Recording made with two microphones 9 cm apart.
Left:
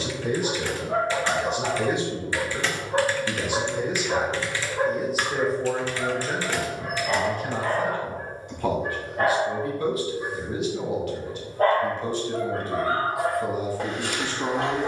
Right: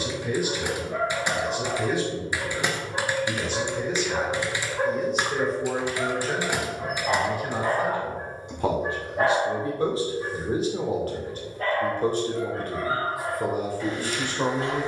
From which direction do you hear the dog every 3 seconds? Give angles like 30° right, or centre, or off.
60° left, 20° left, 20° right, 20° left, 60° left.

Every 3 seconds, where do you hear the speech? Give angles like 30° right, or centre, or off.
20° left, 10° left, 10° right, 30° right, 50° right.